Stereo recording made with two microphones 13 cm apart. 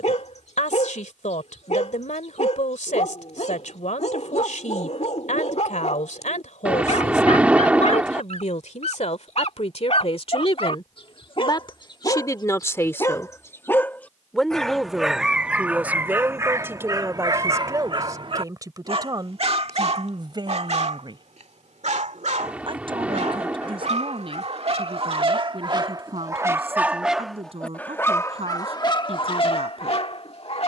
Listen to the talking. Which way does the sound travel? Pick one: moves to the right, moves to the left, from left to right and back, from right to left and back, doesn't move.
moves to the right.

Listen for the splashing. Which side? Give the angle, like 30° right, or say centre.
10° right.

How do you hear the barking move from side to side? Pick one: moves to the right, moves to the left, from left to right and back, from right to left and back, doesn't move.
from left to right and back.